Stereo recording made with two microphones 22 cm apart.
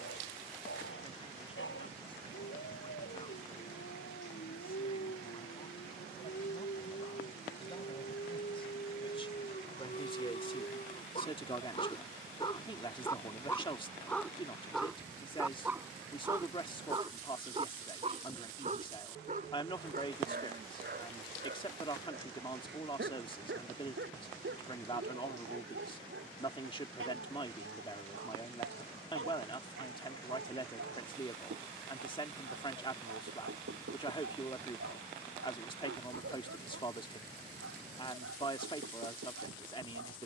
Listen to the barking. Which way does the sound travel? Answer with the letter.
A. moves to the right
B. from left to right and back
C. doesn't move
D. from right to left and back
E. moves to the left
A.